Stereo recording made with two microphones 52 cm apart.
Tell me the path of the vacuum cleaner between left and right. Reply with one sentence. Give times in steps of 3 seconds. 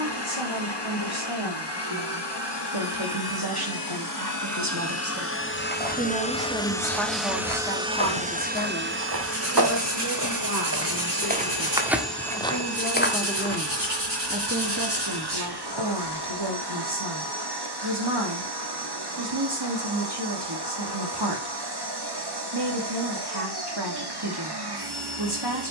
You can hear the vacuum cleaner on the left from 0 s, in the centre from 6 s and on the right from 9 s.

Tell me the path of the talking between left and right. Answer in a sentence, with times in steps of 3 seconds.
In this clip you hear the talking on the right from 0 s, in the centre from 6 s, on the left from 9 s, in the centre from 12 s and on the right from 15 s.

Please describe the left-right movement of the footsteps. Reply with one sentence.
In this clip you hear the footsteps travel towards the left.